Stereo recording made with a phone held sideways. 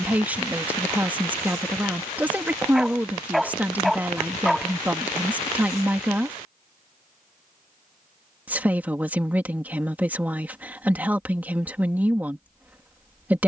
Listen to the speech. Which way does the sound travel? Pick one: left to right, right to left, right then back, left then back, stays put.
stays put.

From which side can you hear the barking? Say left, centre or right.
centre.